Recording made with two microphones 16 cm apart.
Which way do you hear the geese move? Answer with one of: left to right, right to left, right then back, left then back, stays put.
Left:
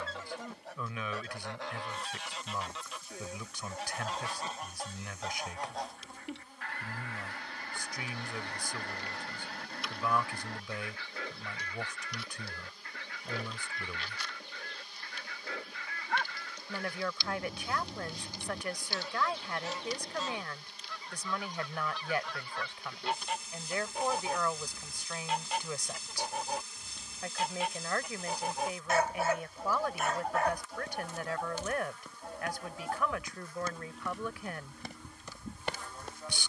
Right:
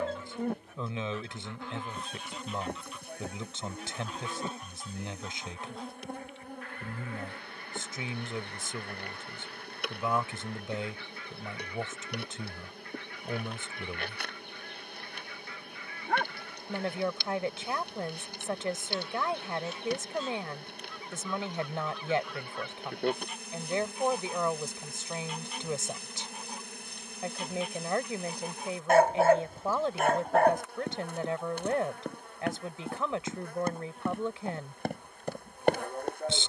stays put.